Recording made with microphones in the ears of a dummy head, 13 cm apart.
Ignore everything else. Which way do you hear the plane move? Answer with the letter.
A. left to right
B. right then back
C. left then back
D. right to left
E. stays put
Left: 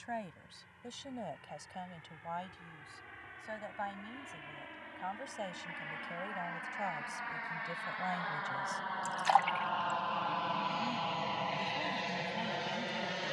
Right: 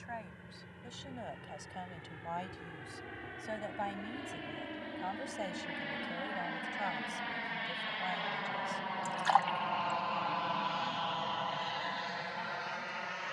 D.